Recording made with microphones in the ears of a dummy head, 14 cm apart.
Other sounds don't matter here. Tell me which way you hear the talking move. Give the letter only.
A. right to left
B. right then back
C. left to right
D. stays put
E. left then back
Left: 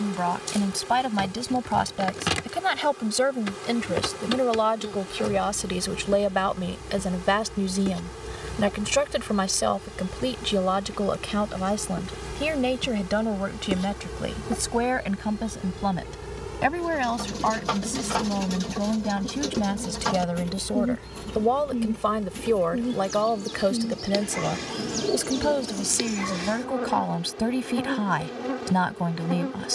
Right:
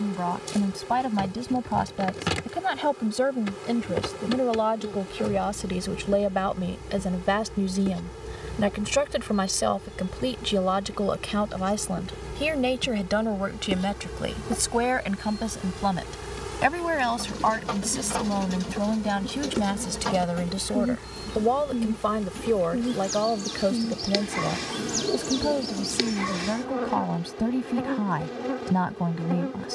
B.